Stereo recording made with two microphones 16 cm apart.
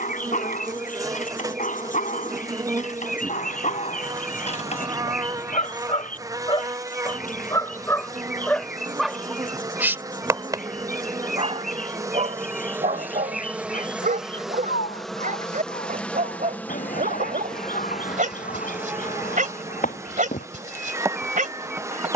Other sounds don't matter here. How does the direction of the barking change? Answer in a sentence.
In this clip you hear the barking move to the right.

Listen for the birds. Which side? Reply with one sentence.
You can hear the birds on the left.